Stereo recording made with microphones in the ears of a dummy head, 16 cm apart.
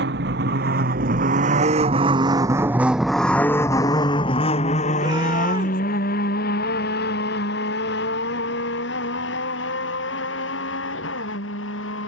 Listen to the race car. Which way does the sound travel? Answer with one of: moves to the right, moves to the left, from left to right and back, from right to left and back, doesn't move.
moves to the left.